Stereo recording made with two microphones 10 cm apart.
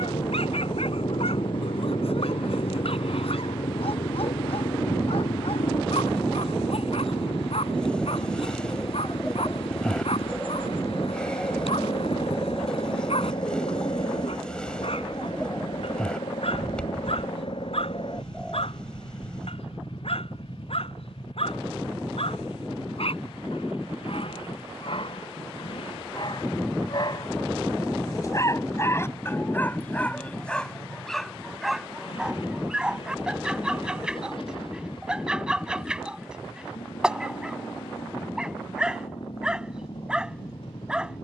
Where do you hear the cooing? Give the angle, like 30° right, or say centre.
10° left.